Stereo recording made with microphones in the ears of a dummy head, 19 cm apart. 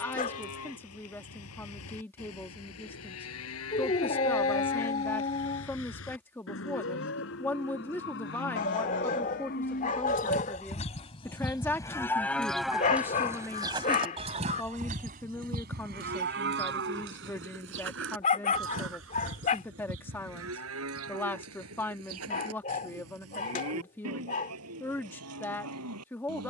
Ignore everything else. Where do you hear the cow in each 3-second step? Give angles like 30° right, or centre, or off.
70° left, 70° left, 60° left, 30° left, 10° right, 50° right, 70° right, 70° right, 80° right.